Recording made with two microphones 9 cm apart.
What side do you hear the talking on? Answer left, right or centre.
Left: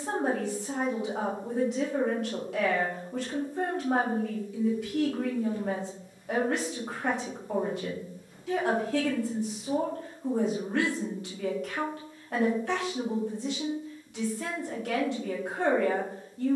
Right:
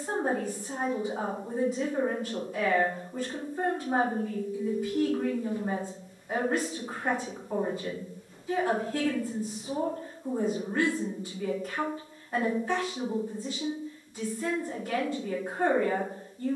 left.